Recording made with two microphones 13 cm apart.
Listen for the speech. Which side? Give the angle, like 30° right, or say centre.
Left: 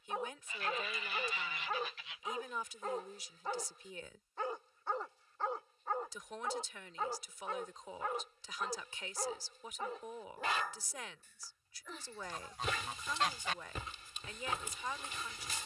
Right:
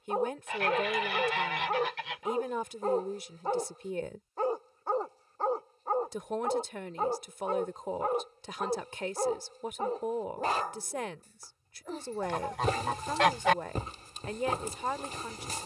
50° right.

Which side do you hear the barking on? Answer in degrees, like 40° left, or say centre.
40° right.